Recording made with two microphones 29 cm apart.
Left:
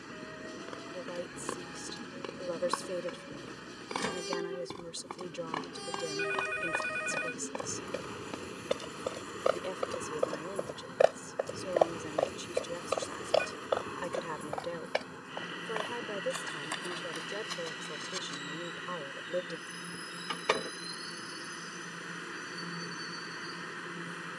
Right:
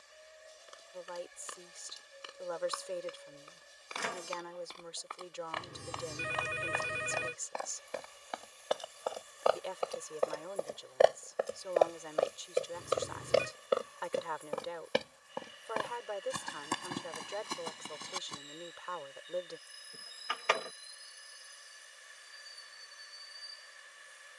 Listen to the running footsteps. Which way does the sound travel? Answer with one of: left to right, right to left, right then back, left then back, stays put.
left to right.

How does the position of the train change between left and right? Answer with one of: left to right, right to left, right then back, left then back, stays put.
stays put.